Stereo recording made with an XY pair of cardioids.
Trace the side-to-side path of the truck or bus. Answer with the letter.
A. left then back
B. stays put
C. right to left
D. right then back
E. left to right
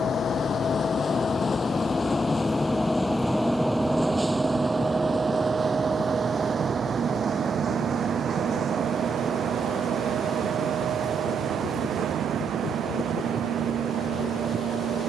E.